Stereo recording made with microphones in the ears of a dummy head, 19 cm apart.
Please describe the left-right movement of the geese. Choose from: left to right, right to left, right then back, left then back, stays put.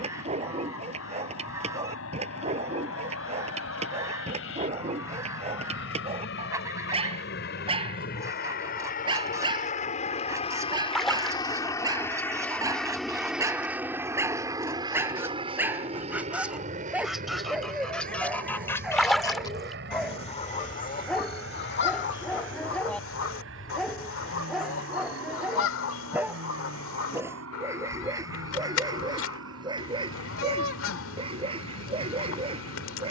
right to left.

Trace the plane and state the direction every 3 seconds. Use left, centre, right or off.
left, left, left, left, centre, right, right, right, right, right, right.